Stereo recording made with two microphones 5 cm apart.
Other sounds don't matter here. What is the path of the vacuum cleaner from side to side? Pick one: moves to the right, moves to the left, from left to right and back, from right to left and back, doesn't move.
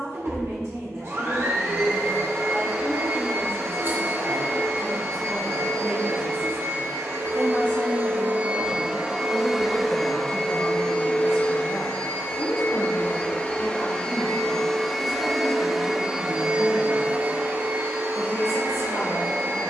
from right to left and back.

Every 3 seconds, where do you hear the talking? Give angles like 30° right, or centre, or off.
60° right, 60° right, 20° right, 40° left, 70° left, 80° left, 80° left.